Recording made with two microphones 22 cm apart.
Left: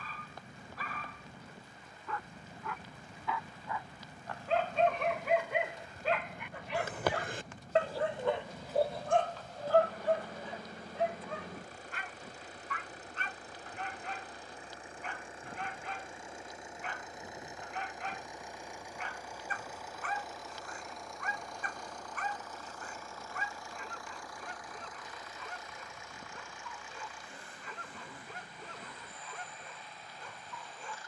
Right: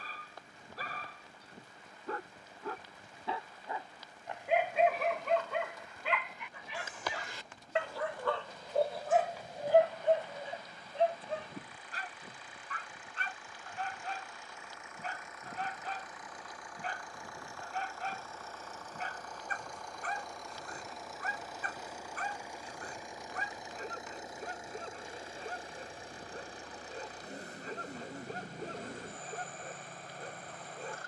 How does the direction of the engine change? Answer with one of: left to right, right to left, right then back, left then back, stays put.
left to right.